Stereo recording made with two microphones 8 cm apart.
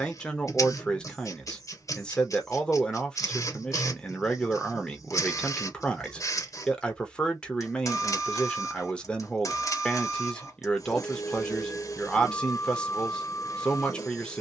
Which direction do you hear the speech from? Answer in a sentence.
You can hear the speech in the centre.